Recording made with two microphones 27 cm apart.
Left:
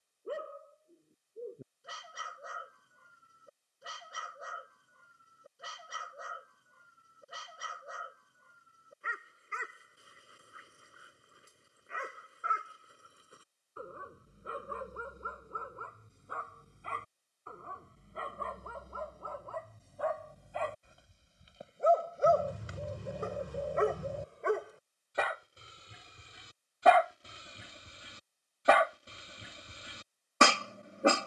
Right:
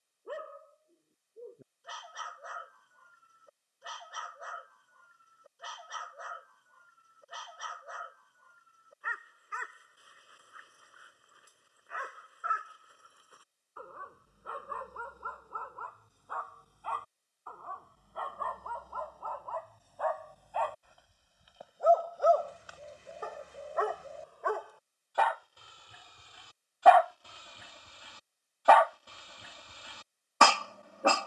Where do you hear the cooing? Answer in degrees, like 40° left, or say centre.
60° left.